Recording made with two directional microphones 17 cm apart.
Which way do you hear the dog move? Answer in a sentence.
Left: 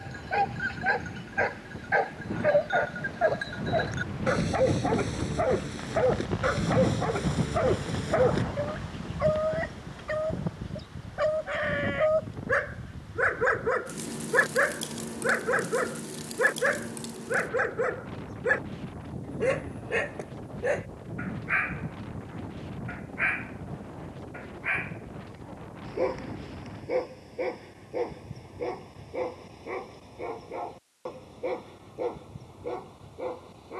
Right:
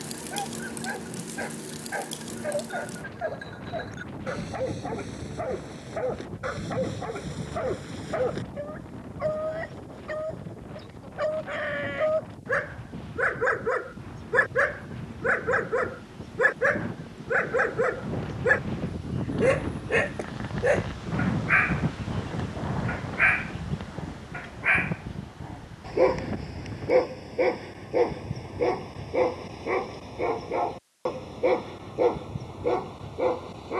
You can hear the dog move to the right.